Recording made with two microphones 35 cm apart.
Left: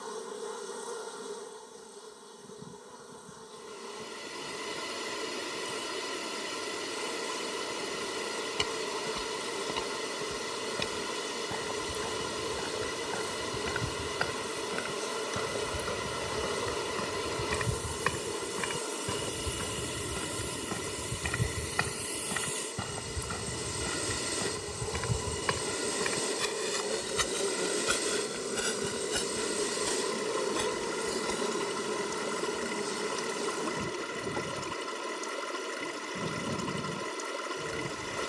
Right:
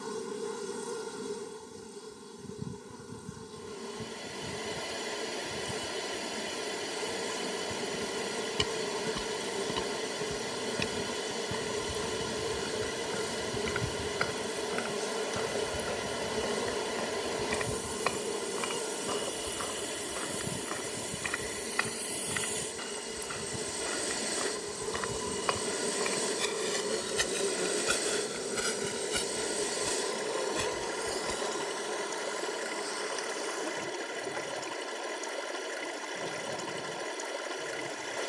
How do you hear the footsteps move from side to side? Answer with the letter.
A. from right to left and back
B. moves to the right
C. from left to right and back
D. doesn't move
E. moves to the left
A.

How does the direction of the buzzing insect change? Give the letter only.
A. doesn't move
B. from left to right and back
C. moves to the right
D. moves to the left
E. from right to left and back
D.